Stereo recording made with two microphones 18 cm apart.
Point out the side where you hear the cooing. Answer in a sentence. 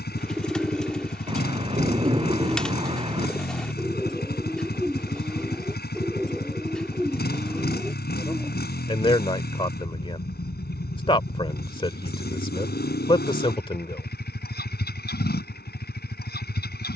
You can hear the cooing in the centre.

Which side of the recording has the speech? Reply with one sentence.
You can hear the speech on the left.